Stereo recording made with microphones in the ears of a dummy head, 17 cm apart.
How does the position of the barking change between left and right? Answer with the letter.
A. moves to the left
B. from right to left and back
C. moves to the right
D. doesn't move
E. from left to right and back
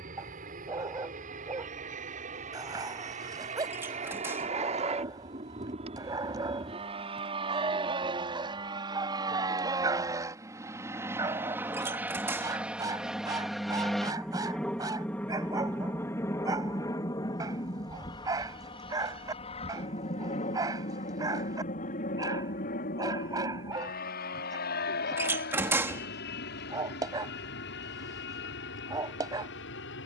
D.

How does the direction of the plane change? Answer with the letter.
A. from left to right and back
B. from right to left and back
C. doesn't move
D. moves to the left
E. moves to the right
D.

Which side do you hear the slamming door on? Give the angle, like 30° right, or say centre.
10° right.